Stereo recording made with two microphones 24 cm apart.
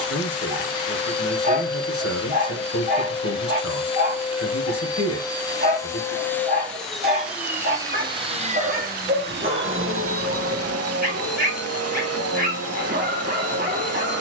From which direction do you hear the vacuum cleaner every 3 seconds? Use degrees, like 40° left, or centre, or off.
20° left, 20° left, 10° right, 70° right, 80° right.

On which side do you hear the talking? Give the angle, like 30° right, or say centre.
70° left.